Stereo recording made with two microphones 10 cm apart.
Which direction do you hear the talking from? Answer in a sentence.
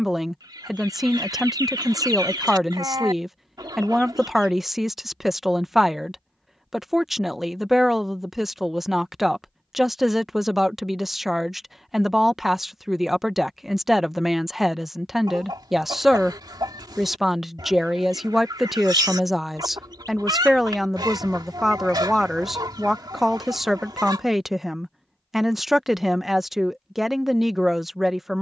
In this clip you hear the talking in the centre.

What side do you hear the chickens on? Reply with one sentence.
You can hear the chickens on the right.